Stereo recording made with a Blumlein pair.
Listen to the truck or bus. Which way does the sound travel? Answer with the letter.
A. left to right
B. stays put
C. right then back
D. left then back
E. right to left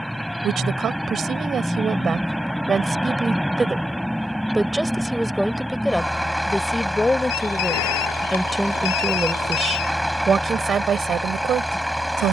B.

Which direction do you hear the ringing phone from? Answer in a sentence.
In this clip you hear the ringing phone on the left.